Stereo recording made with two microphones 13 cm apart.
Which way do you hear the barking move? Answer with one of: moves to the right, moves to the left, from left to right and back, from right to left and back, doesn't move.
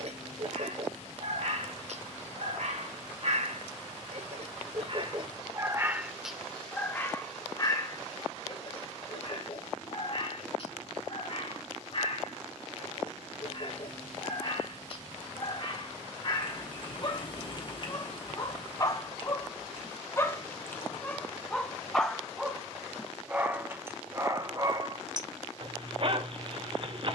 from right to left and back.